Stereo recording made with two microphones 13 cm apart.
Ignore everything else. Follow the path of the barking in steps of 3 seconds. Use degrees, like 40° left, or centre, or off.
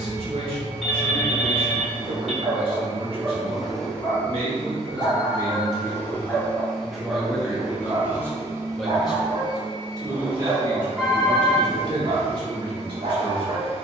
50° right, 30° left, 20° right, 50° right, 50° right.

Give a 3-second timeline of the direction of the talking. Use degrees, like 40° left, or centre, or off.
50° right, 40° right, centre, 30° right, 40° right.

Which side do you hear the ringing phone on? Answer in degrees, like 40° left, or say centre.
centre.